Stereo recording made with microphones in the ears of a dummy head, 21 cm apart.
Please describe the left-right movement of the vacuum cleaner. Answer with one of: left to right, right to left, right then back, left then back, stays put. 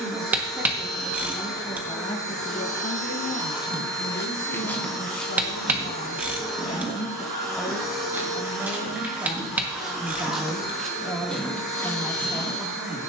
stays put.